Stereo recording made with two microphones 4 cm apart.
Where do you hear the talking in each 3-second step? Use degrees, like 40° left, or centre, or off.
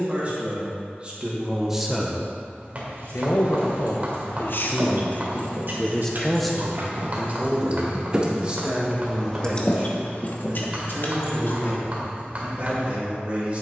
20° right, 50° left, 10° right, 40° right, 40° right.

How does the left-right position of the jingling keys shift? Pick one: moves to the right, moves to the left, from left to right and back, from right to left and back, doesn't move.
moves to the left.